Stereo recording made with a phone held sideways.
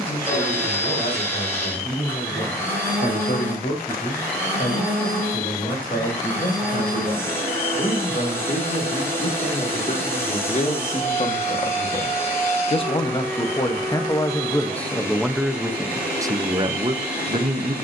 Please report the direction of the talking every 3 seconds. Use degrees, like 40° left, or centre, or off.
60° left, 60° left, 60° left, 50° left, 20° left, 20° right.